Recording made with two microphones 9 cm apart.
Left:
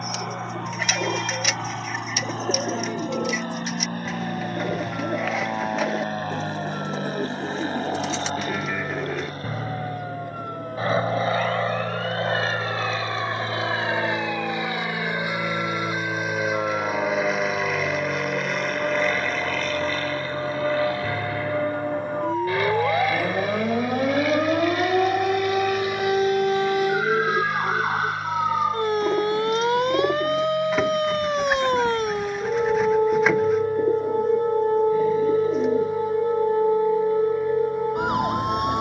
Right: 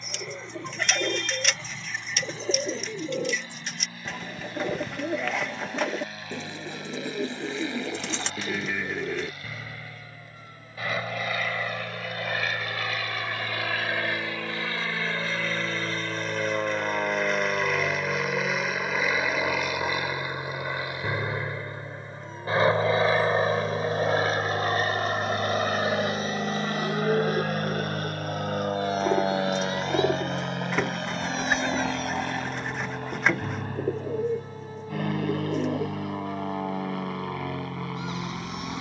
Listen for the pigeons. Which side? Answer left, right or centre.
centre.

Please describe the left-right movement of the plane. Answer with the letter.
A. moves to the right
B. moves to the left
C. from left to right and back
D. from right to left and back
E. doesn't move
A.